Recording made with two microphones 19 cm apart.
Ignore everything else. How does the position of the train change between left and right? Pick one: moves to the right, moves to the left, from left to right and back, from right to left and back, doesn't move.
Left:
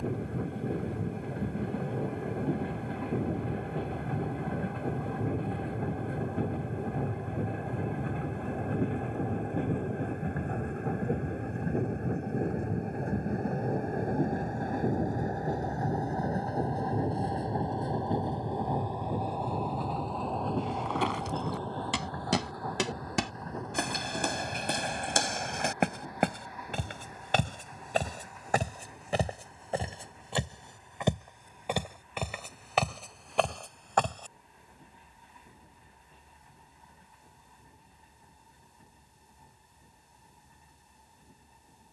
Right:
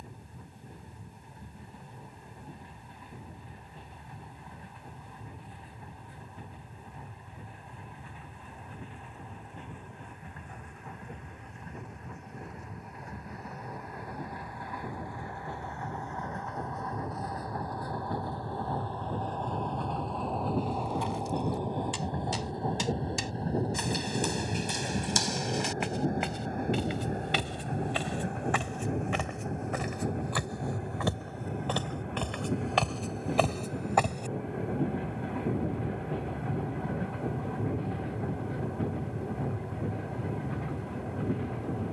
moves to the right.